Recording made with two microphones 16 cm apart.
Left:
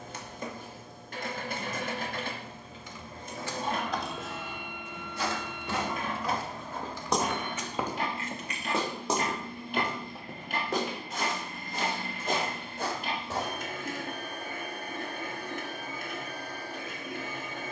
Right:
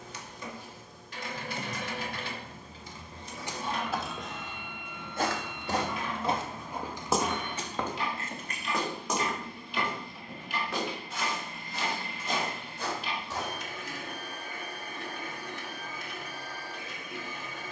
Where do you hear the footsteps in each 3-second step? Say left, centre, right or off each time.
off, right, centre, left, left, off.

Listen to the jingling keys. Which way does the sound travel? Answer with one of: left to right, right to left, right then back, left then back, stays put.
left then back.